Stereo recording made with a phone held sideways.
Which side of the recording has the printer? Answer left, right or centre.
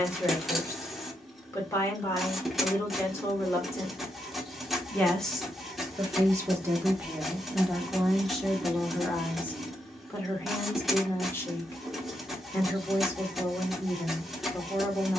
centre.